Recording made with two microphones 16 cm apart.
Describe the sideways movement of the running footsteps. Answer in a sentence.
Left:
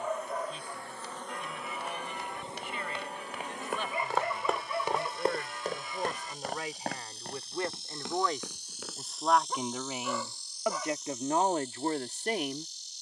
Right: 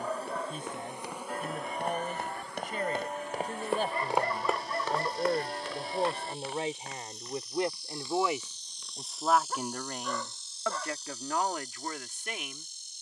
You can hear the running footsteps move from right to left.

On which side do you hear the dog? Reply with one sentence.
You can hear the dog in the centre.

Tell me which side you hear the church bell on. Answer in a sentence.
In this clip you hear the church bell on the right.